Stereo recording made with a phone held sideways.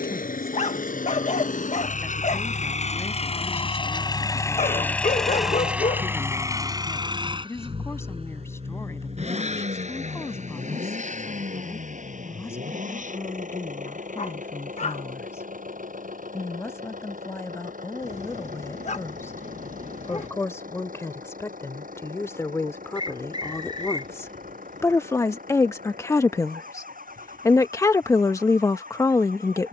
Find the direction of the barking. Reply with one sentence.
In this clip you hear the barking on the left.